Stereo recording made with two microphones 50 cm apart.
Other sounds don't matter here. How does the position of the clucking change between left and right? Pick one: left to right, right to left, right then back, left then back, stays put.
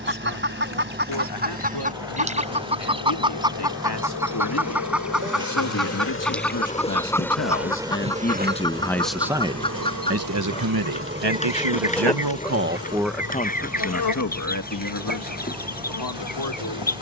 right to left.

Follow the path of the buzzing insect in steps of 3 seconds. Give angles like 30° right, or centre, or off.
60° left, 50° left, centre, 30° right, 40° left, 60° left.